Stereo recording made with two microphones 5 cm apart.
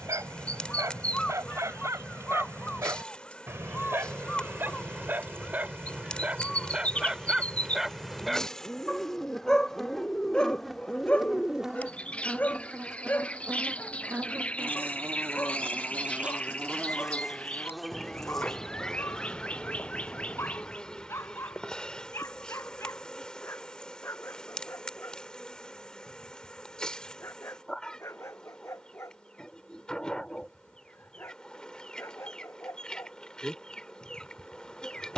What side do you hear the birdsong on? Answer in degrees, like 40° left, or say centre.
20° left.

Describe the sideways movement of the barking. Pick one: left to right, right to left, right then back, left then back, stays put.
right to left.